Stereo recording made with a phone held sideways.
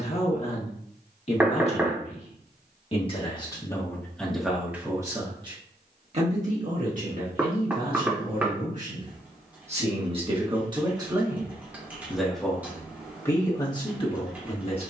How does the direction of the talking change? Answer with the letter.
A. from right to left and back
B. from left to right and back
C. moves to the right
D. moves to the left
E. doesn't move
B.